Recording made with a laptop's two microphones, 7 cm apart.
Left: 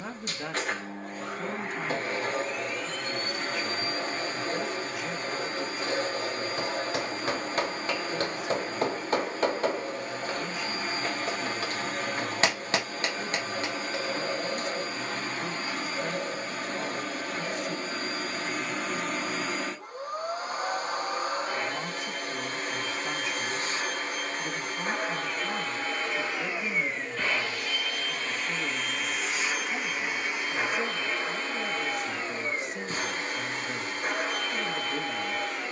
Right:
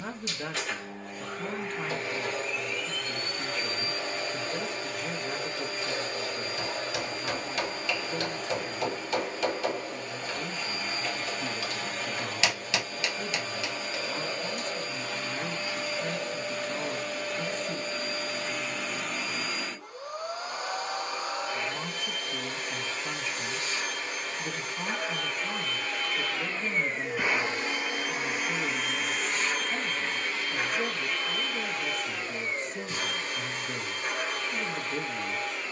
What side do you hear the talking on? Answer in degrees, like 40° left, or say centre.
10° left.